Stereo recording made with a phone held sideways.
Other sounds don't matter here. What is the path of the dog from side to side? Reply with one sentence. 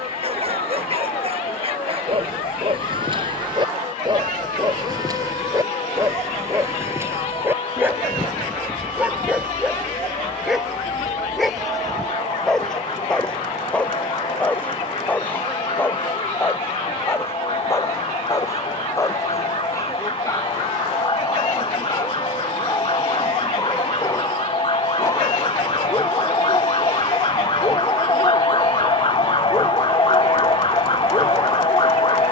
In this clip you hear the dog travel towards the left.